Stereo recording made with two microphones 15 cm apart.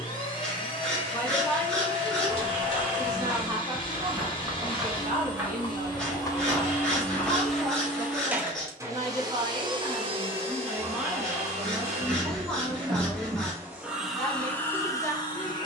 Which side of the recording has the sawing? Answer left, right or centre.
centre.